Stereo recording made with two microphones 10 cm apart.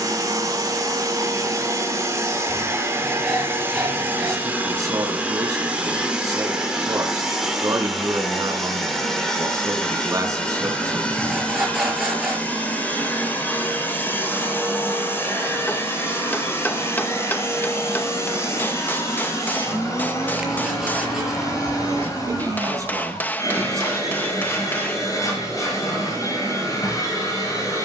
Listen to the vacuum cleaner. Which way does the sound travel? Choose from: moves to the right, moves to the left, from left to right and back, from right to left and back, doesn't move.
moves to the left.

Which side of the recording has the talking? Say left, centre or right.
right.